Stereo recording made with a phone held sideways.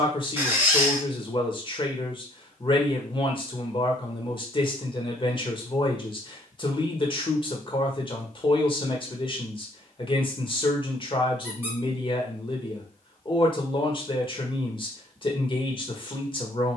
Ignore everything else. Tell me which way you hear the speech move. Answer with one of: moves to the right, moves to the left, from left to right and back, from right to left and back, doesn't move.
doesn't move.